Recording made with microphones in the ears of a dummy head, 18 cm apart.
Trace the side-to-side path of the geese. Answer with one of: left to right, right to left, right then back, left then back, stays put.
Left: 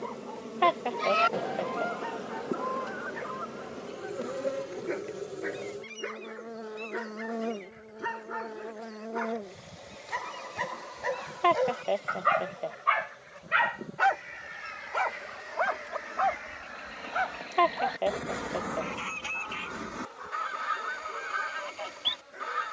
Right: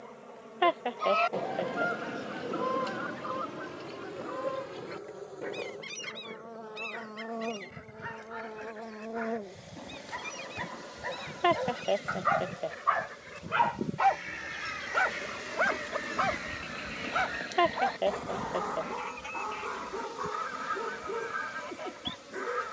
right then back.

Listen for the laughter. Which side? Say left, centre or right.
centre.